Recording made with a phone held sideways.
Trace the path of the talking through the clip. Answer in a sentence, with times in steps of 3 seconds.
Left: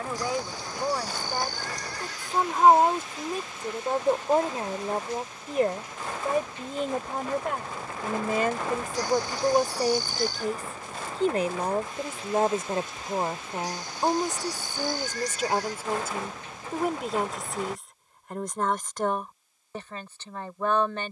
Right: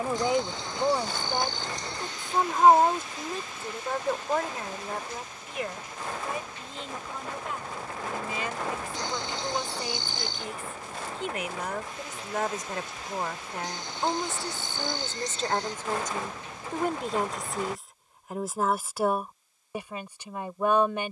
In this clip you hear the talking in the centre from 0 s, on the left from 3 s and in the centre from 15 s.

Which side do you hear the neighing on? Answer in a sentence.
In this clip you hear the neighing on the right.